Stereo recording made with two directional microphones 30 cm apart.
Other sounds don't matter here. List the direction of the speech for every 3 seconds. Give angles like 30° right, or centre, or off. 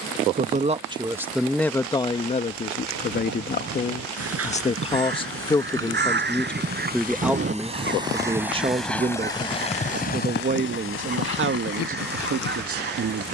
10° left, 20° left, 10° right, 30° right, 50° right.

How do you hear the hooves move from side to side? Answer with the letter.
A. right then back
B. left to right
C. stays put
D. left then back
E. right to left
E.